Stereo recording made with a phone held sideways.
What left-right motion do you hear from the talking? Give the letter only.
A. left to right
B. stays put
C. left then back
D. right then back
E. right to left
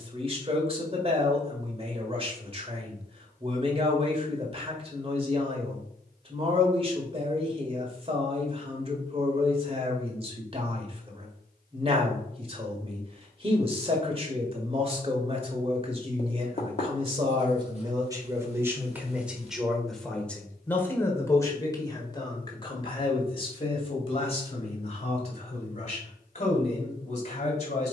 E.